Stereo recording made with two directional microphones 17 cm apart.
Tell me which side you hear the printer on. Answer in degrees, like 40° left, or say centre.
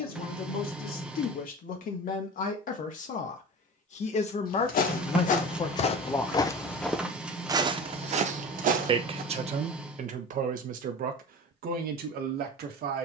10° right.